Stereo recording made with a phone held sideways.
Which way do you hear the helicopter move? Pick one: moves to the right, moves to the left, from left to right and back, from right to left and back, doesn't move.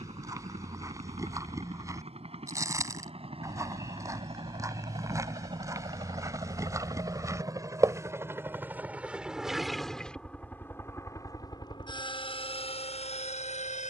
moves to the left.